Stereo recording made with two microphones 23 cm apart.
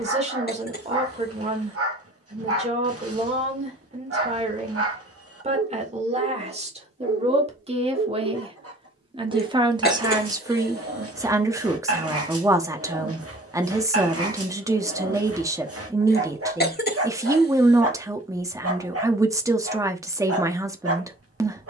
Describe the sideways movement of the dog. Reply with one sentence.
You can hear the dog stay in one place.